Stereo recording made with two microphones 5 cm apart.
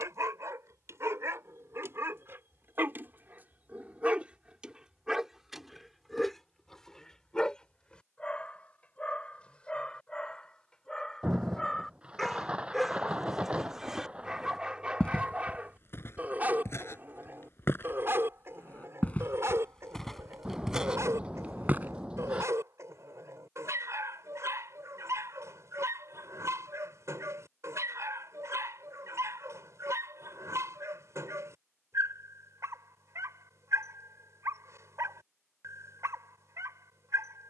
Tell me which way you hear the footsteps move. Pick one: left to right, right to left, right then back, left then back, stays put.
left then back.